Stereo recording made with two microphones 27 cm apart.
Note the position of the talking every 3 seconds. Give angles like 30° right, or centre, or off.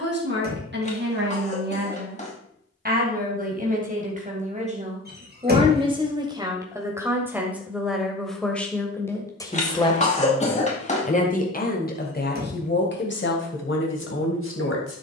40° right, 30° right, centre, 20° left, 50° left.